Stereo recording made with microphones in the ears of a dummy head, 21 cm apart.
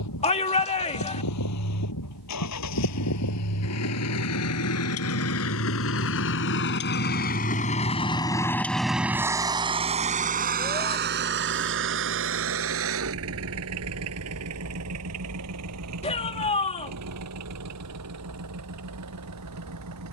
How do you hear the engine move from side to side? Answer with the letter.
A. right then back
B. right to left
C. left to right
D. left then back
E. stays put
C.